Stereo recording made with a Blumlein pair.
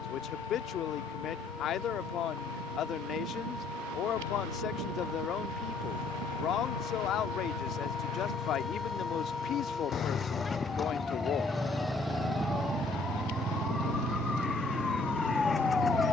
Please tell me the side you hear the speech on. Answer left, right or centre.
left.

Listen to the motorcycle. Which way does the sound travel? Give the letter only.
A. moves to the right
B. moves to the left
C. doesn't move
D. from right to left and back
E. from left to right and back
A.